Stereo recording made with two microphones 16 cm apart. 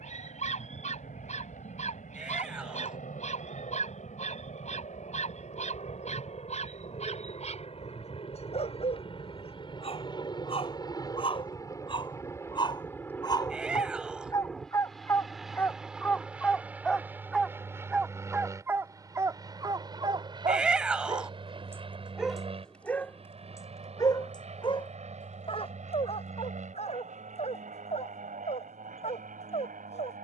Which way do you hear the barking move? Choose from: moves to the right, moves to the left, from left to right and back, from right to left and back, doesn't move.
from left to right and back.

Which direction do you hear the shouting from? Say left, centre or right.
centre.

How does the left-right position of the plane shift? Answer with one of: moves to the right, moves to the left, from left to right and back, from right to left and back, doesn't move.
moves to the right.